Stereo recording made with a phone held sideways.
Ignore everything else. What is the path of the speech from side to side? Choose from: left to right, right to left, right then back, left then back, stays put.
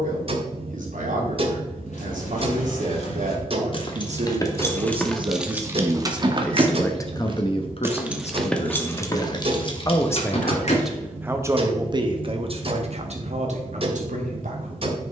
left then back.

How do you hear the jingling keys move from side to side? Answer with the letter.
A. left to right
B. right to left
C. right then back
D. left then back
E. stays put
C.